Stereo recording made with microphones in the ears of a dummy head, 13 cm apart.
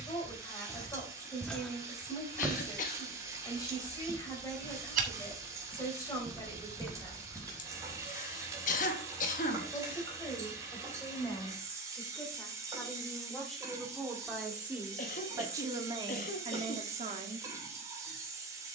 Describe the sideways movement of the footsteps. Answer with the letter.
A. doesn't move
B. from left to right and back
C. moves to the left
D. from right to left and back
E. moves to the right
B.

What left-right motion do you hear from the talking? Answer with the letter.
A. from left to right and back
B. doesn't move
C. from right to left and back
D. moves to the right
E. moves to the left
D.